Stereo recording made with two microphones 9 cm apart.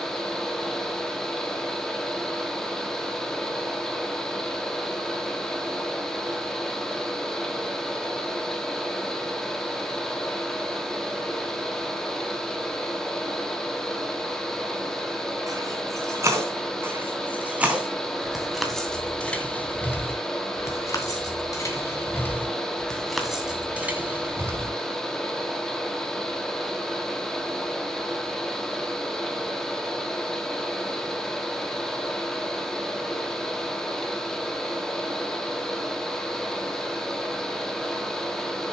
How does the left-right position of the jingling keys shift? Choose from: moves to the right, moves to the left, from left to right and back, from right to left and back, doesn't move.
from right to left and back.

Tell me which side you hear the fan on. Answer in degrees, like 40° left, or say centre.
10° left.